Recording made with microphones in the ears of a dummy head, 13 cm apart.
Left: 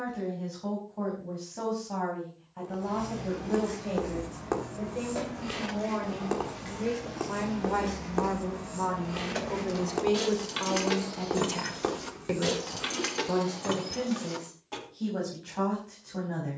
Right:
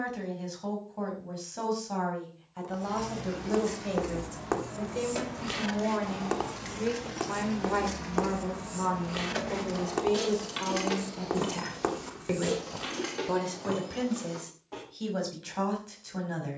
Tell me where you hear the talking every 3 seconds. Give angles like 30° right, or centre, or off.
70° right, 50° right, 20° right, 10° left, 40° right, 70° right.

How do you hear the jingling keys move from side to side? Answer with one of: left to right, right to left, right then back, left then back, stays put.
right to left.